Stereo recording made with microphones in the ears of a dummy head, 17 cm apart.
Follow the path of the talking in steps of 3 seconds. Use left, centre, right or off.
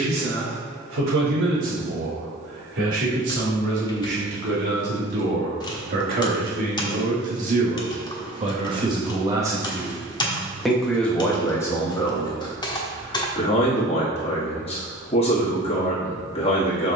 right, right, right, centre, left, left.